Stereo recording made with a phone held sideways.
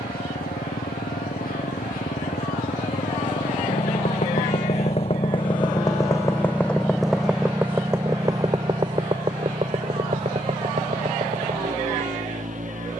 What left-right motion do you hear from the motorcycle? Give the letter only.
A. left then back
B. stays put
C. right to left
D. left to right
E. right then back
D.